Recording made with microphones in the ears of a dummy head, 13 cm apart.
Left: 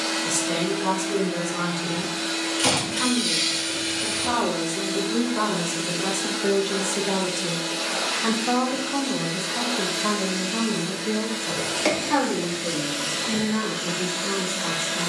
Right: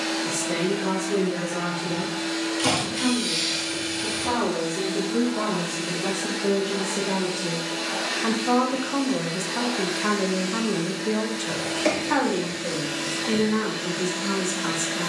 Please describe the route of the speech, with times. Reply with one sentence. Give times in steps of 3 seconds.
You can hear the speech on the left from 0 s and on the right from 9 s.